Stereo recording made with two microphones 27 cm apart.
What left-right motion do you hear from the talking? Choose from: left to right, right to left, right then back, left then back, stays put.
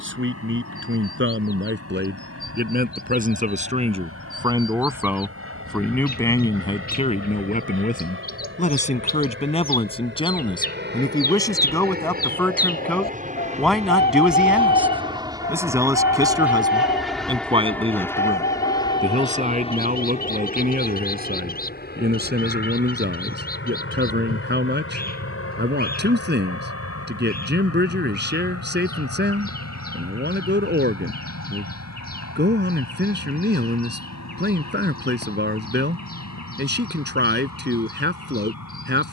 left then back.